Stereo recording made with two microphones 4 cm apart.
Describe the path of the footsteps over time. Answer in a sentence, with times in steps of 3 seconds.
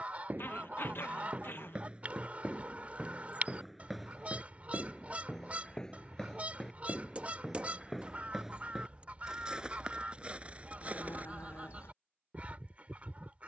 You can hear the footsteps on the right from 0 s, in the centre from 3 s, on the right from 9 s and not at all from 12 s.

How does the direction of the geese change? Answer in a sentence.
You can hear the geese stay in one place.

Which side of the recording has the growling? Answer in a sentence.
You can hear the growling on the left.